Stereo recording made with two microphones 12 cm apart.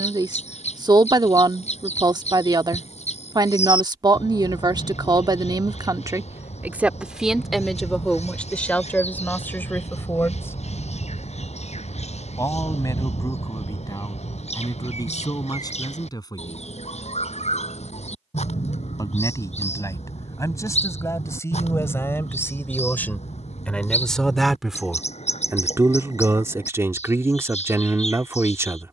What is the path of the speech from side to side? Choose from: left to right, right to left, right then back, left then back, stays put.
left then back.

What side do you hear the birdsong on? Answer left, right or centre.
left.